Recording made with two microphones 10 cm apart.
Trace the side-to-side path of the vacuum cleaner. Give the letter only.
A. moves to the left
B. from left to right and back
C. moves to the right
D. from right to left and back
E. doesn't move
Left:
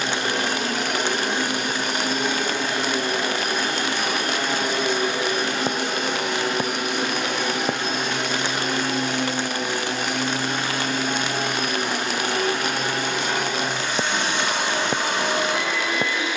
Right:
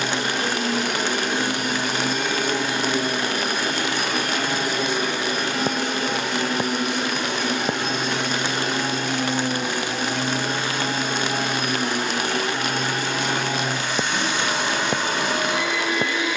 B.